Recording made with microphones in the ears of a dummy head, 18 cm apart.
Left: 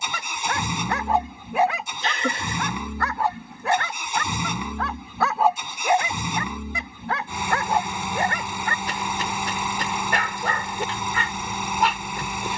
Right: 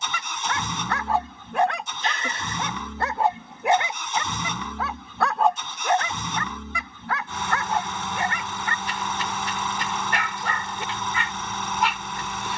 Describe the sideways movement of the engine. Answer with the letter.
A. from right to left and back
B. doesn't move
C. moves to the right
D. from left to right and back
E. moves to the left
B.